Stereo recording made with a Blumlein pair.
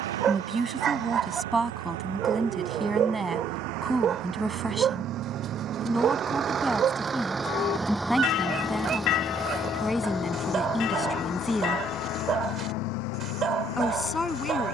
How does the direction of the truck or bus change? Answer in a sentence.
You can hear the truck or bus travel towards the left.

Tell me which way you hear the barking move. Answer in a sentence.
In this clip you hear the barking stay in one place.